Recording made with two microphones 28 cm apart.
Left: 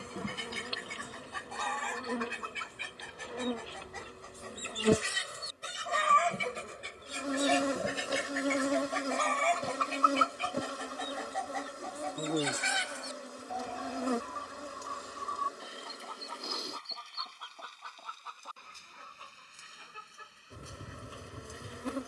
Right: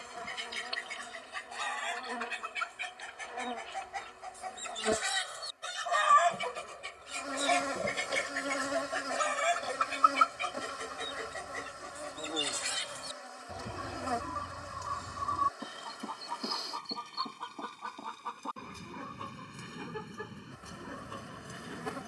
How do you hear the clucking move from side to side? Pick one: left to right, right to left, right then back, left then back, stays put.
left to right.